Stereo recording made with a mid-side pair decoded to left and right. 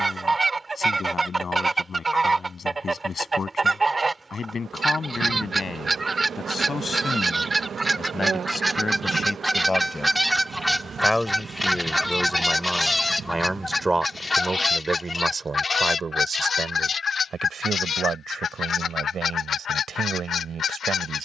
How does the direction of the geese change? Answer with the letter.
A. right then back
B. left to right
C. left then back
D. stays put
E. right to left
E.